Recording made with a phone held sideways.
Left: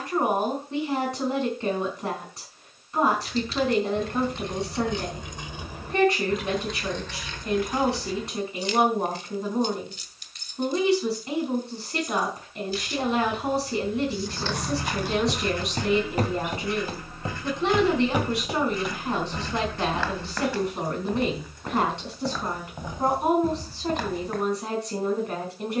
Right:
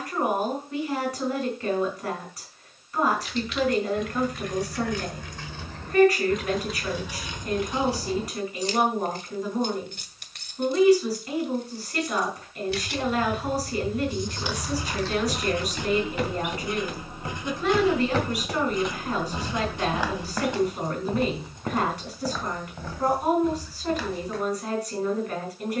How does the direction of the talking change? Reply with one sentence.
In this clip you hear the talking stay in one place.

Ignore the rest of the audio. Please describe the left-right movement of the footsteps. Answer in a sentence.
You can hear the footsteps go right and come back.